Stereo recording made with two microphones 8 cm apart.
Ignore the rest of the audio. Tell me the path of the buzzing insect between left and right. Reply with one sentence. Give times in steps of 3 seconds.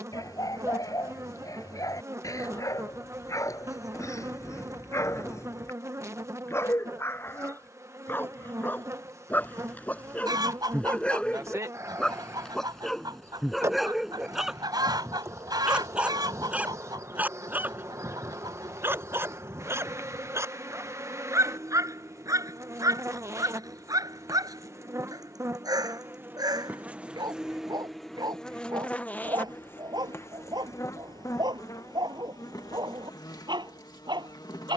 In this clip you hear the buzzing insect on the right from 0 s, in the centre from 27 s and on the left from 30 s.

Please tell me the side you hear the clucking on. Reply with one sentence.
In this clip you hear the clucking on the right.